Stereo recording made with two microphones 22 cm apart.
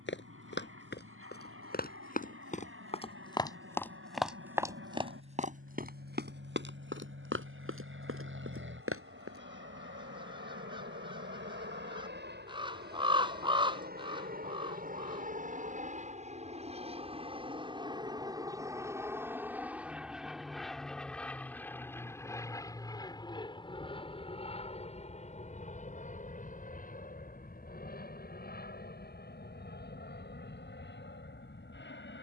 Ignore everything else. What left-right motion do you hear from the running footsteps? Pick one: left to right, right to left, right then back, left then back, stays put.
left to right.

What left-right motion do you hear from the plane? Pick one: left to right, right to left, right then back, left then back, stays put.
right to left.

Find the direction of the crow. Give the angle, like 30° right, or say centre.
20° right.